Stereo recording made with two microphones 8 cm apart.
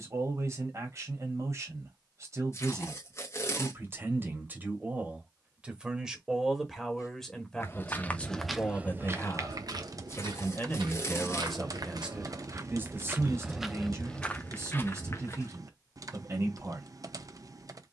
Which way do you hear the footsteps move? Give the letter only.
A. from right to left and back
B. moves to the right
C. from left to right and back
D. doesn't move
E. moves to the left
C.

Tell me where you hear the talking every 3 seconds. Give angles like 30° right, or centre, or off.
40° right, 20° right, 10° left, 20° left, 30° right, 40° right.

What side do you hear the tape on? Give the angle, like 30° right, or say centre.
40° left.